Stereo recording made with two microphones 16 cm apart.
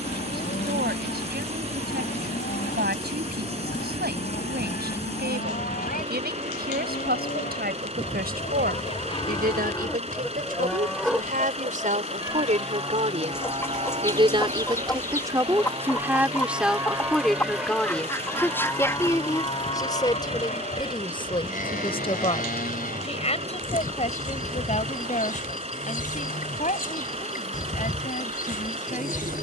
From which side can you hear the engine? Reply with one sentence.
You can hear the engine on the right.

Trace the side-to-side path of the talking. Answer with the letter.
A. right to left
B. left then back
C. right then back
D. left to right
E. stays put
A.